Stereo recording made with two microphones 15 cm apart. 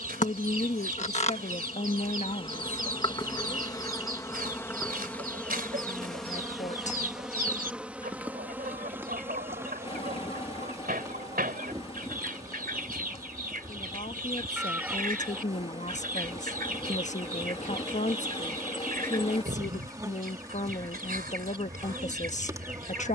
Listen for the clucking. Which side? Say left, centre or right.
right.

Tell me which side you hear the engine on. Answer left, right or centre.
left.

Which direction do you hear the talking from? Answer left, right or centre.
left.